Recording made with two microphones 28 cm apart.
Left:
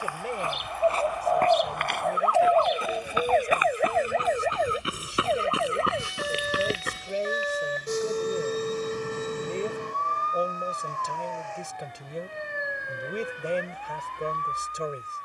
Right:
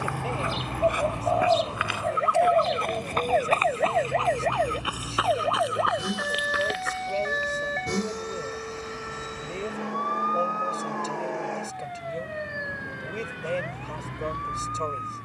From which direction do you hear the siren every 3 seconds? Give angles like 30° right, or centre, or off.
40° right, 10° left, 40° left, 50° left, 50° left.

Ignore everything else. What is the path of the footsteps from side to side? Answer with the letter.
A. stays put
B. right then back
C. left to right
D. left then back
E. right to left
E.